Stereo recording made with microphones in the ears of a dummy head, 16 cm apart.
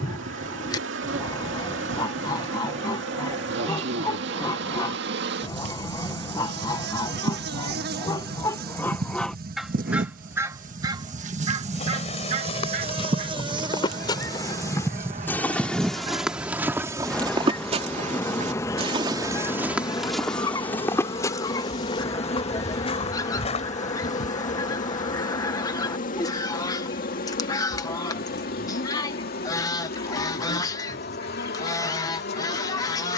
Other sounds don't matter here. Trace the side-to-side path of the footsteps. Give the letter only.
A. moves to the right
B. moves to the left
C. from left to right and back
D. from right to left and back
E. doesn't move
C.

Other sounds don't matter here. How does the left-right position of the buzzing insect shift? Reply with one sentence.
You can hear the buzzing insect move to the left.